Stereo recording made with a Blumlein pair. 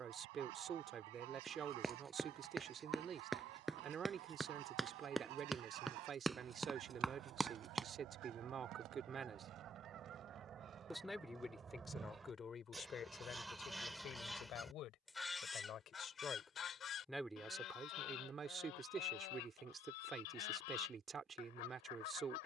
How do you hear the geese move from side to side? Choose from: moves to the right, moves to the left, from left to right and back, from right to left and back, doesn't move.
moves to the left.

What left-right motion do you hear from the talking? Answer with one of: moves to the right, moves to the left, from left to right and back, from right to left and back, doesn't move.
from right to left and back.